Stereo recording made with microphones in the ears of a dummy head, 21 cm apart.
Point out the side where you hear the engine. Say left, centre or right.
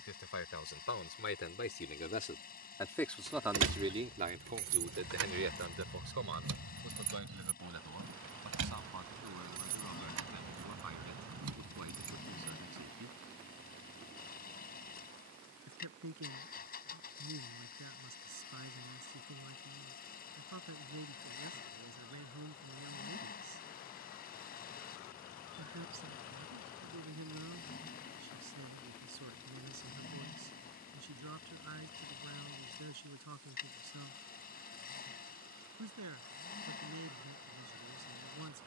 left.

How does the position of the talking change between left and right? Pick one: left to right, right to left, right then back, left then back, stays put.
left to right.